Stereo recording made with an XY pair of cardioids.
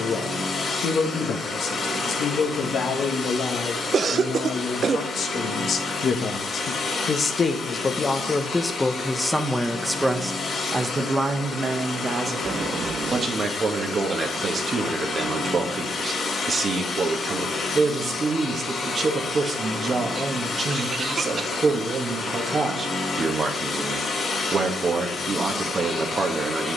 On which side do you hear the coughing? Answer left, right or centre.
right.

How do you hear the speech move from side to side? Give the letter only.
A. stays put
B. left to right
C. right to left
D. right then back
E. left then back
B.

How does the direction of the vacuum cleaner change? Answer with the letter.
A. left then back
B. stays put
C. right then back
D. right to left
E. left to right
B.